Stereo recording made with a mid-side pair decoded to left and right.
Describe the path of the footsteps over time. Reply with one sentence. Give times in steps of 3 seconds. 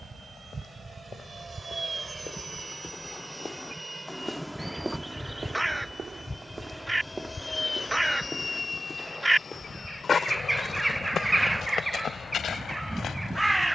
You can hear the footsteps on the left from 0 s, in the centre from 3 s and on the left from 9 s.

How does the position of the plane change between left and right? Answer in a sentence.
In this clip you hear the plane travel towards the left.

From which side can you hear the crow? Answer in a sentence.
You can hear the crow in the centre.